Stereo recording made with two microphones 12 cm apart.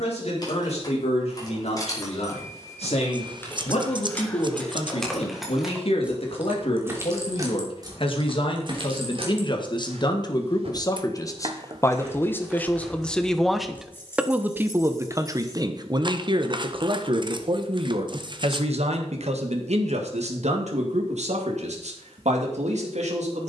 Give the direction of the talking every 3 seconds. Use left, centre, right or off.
left, left, left, left, centre, right, right, right.